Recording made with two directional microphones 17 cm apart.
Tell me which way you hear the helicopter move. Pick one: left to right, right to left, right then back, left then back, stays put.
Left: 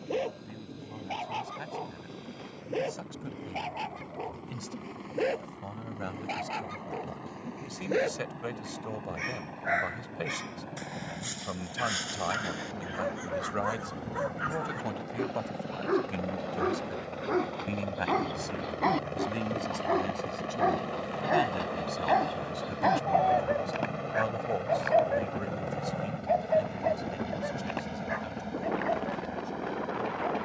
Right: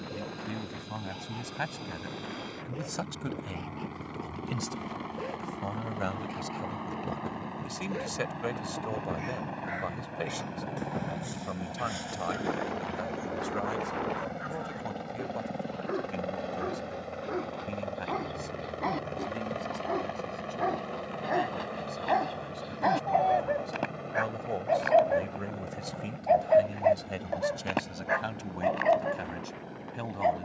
right to left.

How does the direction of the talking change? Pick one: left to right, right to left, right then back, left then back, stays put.
left then back.